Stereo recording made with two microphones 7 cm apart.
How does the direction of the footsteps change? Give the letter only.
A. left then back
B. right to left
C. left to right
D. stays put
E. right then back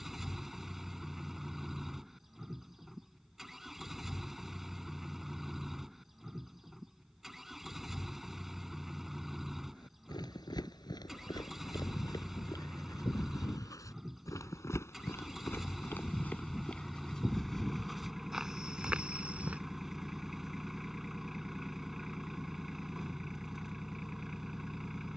C.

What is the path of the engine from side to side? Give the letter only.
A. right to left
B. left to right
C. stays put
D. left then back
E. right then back
C.